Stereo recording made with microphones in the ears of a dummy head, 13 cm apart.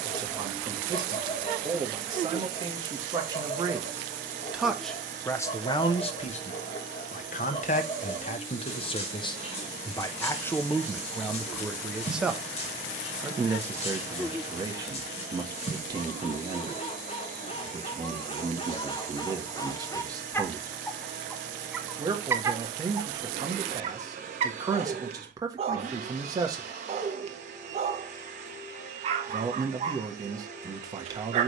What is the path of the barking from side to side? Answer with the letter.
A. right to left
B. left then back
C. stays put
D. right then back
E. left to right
E.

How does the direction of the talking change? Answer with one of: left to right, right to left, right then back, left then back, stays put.
left then back.